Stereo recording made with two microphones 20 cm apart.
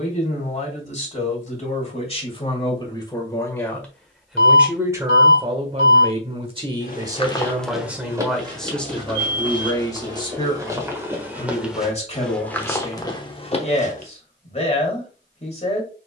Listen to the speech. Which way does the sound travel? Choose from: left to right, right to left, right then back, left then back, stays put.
right then back.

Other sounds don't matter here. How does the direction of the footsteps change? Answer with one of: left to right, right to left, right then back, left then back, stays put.
right then back.